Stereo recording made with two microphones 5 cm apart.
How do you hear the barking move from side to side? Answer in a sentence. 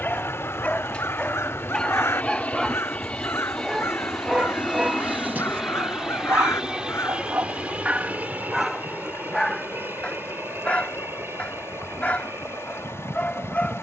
You can hear the barking go right and come back.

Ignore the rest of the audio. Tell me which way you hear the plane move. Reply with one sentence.
You can hear the plane move from left to right.